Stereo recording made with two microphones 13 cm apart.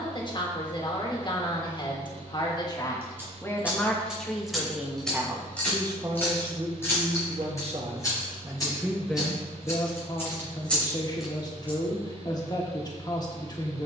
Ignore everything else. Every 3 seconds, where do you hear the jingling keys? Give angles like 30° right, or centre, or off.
off, centre, 20° left, 10° left, off.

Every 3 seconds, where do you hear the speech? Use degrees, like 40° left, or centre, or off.
30° left, centre, 40° right, 30° left, 30° left.